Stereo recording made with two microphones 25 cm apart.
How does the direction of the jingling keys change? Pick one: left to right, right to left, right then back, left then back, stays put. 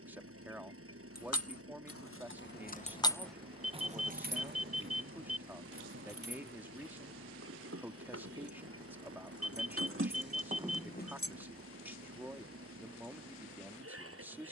right then back.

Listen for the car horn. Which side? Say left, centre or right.
right.